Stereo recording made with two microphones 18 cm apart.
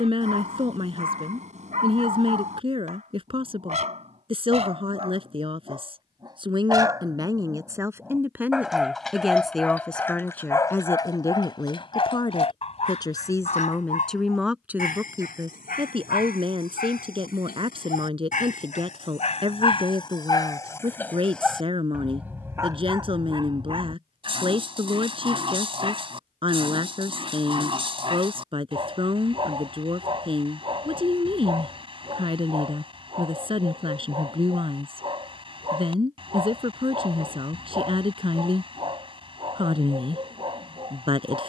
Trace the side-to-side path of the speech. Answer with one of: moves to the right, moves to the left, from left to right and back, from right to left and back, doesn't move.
from right to left and back.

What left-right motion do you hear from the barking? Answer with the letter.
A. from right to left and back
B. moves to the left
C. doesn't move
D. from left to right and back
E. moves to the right
A.